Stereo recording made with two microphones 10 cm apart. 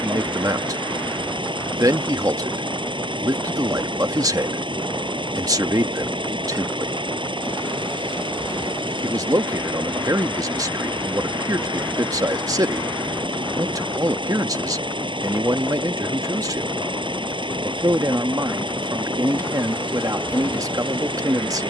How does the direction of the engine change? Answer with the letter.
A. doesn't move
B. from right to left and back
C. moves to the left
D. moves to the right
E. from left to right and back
A.